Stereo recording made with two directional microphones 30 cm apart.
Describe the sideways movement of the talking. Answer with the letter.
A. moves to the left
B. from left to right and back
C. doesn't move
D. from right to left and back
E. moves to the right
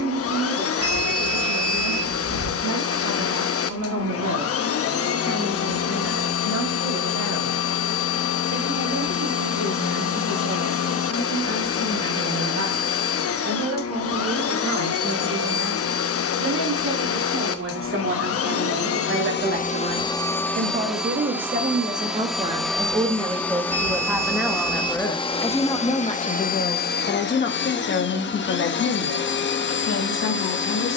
A.